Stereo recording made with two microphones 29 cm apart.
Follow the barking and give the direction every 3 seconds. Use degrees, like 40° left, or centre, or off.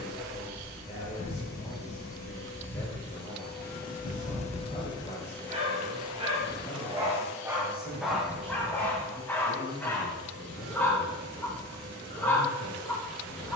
40° right, 30° right, 10° right, 10° left, 10° left.